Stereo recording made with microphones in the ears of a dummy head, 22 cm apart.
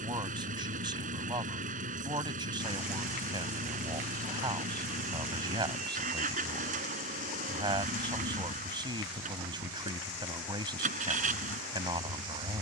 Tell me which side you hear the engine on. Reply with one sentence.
In this clip you hear the engine on the right.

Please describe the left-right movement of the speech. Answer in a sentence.
You can hear the speech stay put.